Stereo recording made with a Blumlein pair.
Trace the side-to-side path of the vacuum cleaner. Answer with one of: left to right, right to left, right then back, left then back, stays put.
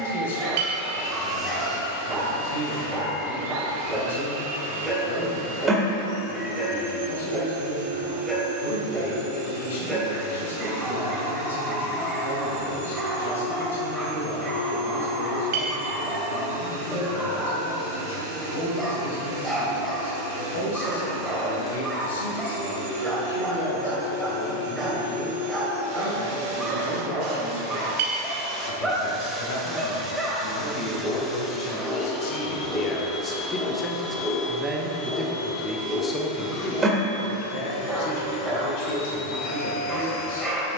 right to left.